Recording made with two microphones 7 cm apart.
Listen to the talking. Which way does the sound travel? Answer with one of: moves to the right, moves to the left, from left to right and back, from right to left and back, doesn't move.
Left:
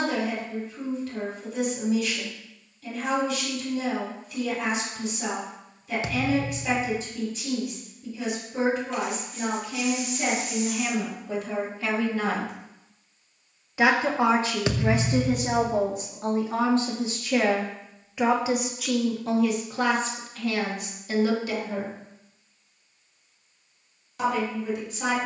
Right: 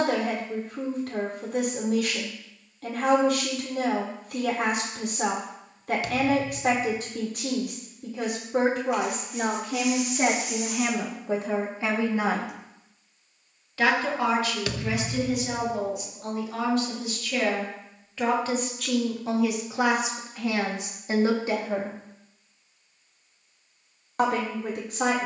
from right to left and back.